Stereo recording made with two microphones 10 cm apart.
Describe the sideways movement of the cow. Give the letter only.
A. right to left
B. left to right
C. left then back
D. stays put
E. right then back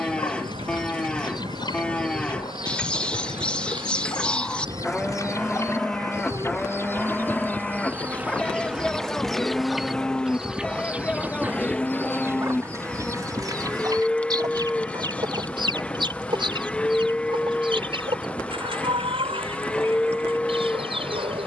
D.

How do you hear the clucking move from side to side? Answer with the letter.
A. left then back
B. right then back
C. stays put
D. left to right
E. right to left
D.